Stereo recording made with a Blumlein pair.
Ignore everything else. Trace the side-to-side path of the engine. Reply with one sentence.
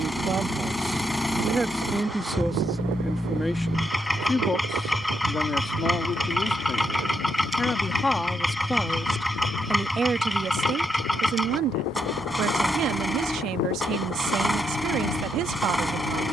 In this clip you hear the engine stay put.